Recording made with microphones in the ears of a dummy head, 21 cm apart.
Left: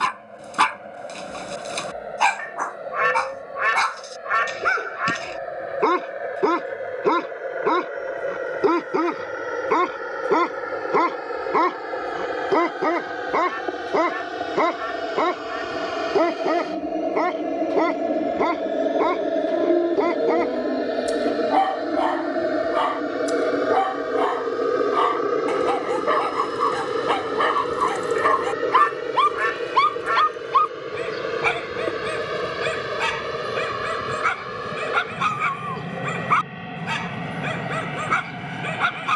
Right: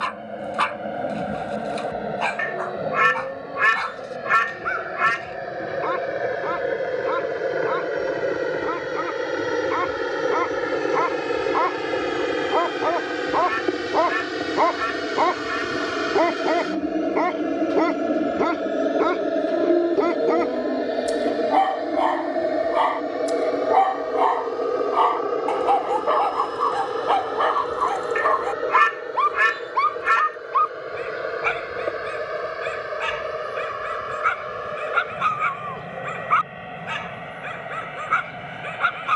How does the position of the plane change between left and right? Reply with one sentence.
You can hear the plane move to the left.